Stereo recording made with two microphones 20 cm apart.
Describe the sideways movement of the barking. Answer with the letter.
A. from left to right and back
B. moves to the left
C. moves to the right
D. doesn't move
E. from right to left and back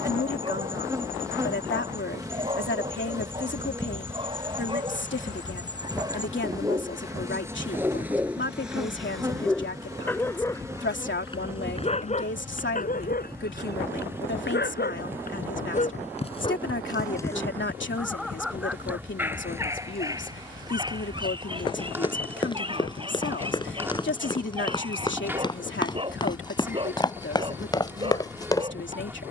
E.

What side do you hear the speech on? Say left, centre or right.
left.